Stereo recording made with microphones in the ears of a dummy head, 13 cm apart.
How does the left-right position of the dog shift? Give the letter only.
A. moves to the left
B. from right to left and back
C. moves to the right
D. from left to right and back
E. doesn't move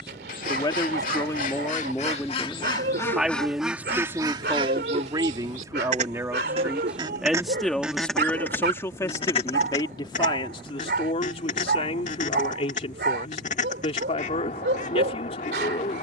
E.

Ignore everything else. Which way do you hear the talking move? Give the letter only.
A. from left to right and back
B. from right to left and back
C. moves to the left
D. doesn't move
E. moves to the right
A.